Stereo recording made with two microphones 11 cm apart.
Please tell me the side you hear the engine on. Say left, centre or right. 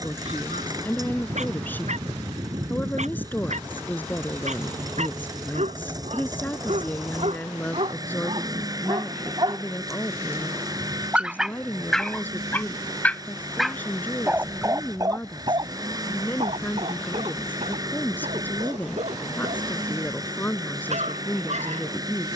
right.